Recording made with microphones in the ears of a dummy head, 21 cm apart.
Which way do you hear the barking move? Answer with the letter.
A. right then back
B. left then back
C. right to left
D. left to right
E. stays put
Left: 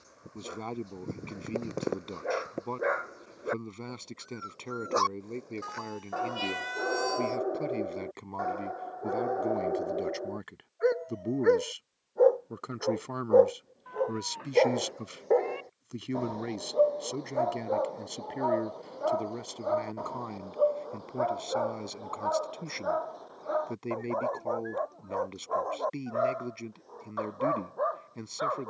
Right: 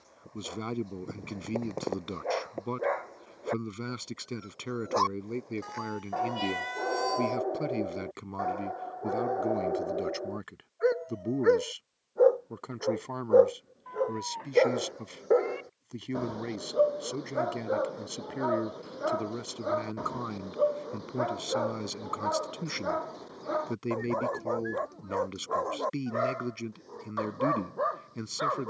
D.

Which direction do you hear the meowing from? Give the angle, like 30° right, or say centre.
10° left.